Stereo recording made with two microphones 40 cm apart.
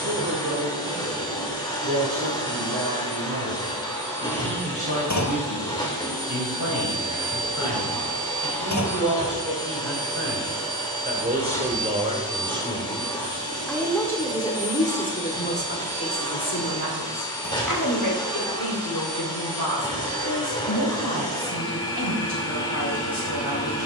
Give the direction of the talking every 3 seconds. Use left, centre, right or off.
right, right, right, right, centre, left, left, left.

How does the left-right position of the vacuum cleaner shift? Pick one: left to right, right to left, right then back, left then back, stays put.
stays put.